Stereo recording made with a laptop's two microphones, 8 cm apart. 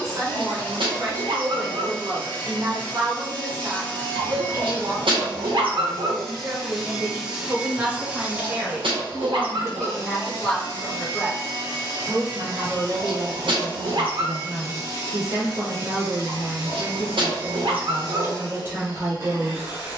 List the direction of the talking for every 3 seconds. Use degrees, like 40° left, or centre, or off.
40° right, 40° right, 30° right, 10° left, 30° right, 30° right, 30° right.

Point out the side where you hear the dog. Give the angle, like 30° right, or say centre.
70° right.